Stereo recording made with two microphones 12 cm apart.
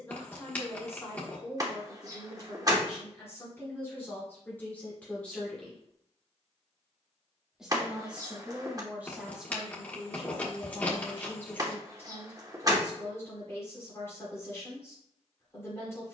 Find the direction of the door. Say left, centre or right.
right.